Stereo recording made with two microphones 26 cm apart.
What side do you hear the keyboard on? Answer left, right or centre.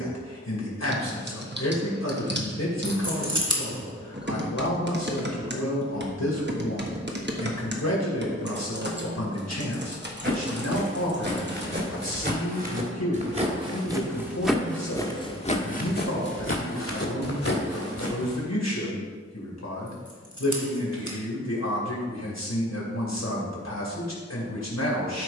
right.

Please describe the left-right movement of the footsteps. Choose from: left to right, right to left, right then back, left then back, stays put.
right to left.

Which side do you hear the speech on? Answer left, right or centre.
left.